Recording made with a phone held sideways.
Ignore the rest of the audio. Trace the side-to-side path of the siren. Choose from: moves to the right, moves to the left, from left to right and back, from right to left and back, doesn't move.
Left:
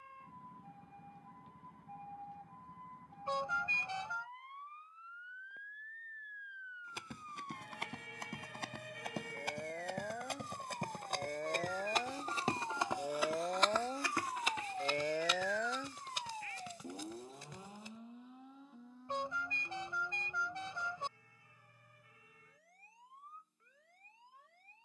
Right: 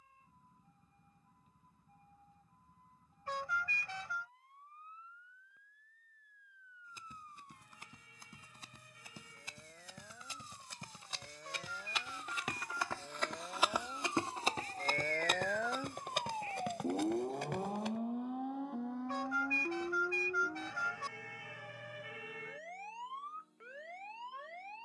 moves to the right.